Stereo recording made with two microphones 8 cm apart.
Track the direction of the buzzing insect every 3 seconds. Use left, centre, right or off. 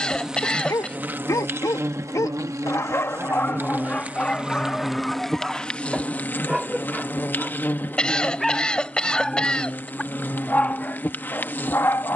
right, centre, left, left.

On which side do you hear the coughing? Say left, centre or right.
centre.